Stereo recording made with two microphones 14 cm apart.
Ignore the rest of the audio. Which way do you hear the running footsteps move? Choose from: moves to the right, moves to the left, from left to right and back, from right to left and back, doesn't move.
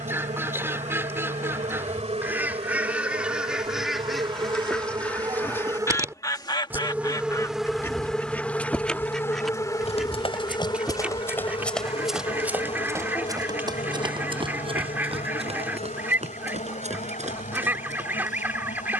moves to the right.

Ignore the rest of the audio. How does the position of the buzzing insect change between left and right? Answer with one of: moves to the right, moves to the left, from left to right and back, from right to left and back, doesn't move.
moves to the left.